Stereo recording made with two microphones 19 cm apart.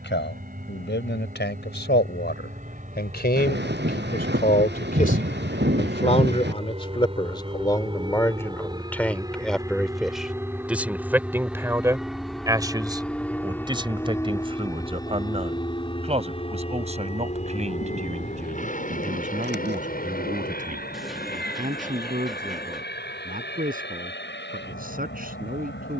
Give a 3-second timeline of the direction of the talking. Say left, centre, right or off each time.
left, left, left, centre, right, right, right, right, right.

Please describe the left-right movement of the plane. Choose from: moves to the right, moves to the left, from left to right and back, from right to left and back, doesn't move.
moves to the left.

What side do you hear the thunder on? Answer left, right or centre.
right.